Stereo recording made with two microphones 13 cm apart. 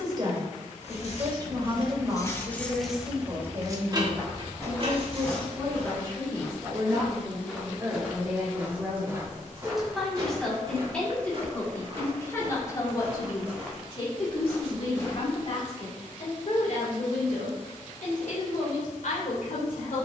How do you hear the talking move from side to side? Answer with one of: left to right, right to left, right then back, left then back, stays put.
right to left.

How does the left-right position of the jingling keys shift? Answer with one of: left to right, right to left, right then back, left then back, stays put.
left to right.